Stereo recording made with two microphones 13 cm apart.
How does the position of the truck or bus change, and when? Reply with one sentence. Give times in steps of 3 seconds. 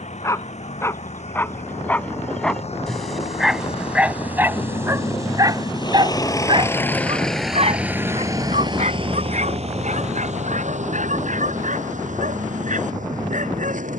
You can hear the truck or bus on the left from 0 s, in the centre from 6 s and on the right from 9 s.